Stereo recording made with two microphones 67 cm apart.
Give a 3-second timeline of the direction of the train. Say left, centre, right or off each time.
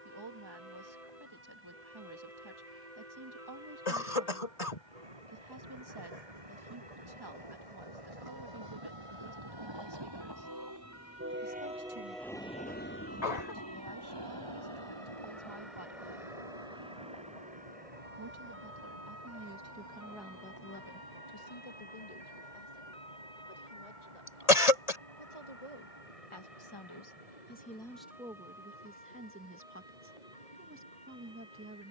right, right, right, right, left, left, left, left, left, left, left.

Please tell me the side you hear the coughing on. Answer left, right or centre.
left.